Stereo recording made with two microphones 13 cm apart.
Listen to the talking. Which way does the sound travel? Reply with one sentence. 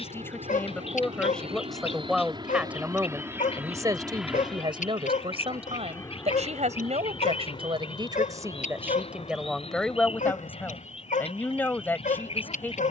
You can hear the talking move from left to right and back again.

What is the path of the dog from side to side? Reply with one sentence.
You can hear the dog stay in one place.